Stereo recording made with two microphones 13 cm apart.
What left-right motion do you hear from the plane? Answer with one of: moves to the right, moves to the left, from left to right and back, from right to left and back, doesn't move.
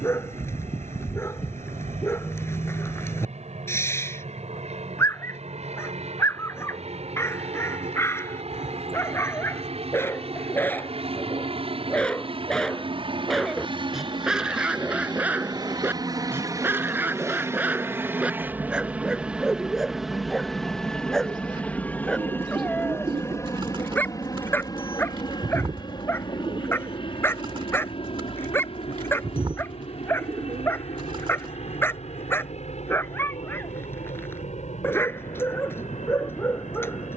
moves to the left.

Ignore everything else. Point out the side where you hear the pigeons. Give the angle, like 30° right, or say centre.
40° right.